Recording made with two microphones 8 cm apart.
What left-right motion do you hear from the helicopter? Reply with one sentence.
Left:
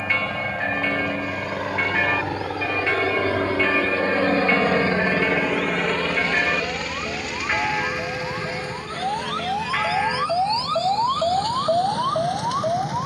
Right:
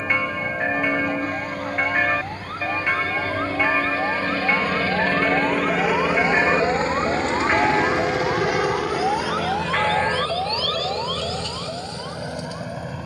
In this clip you hear the helicopter go from the left side to the right.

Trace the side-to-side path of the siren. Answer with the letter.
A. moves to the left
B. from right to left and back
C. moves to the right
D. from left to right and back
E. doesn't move
A.